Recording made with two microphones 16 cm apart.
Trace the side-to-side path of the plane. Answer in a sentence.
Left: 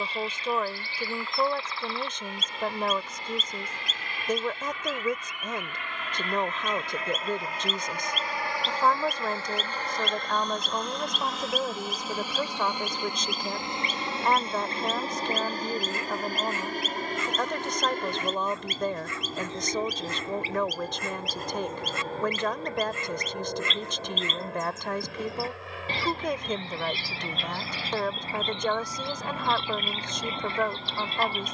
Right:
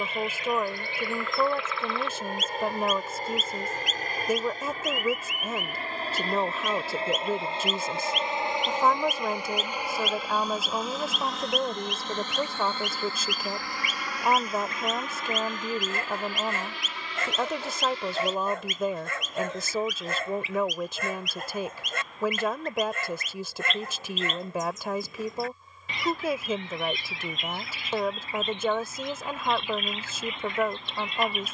You can hear the plane travel towards the left.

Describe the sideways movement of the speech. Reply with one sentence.
In this clip you hear the speech stay put.